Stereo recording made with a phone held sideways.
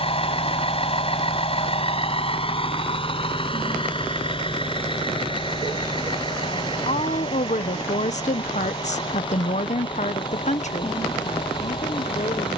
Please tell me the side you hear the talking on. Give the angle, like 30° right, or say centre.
50° left.